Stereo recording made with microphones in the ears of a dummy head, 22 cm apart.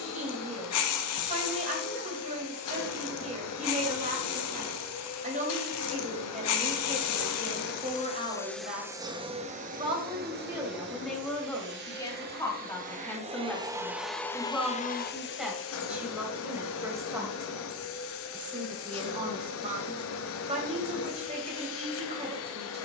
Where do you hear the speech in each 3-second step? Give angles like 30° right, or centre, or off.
30° right, 30° right, 30° right, 10° right, 10° left, 10° right, 30° right, 30° right.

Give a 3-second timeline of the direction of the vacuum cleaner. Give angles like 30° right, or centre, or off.
70° left, 70° left, 40° left, 40° right, 10° right, 60° left, 60° left, 60° left.